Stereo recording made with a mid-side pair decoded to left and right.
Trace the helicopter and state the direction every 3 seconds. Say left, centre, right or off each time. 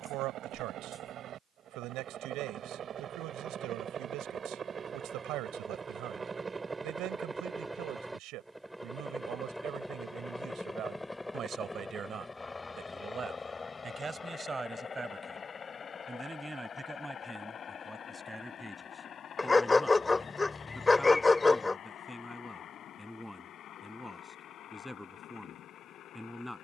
right, right, centre, centre, left, left, left, left, left.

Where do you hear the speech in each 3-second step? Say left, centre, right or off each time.
right, right, right, right, right, centre, centre, centre, centre.